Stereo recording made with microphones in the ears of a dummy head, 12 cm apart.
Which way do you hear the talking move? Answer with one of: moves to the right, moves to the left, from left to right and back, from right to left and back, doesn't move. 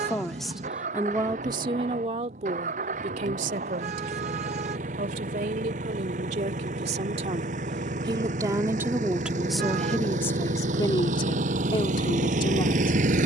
from left to right and back.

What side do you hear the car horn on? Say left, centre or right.
right.